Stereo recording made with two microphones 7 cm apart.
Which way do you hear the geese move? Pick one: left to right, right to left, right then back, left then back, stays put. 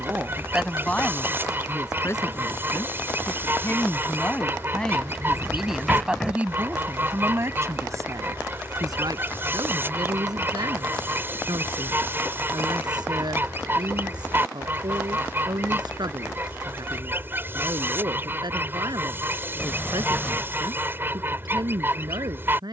stays put.